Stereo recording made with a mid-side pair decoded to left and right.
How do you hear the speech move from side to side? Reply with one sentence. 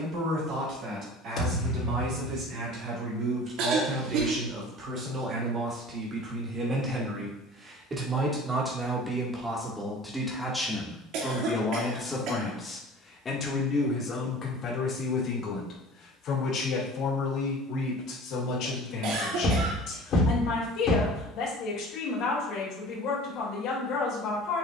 You can hear the speech travel towards the left.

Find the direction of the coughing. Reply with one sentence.
You can hear the coughing on the right.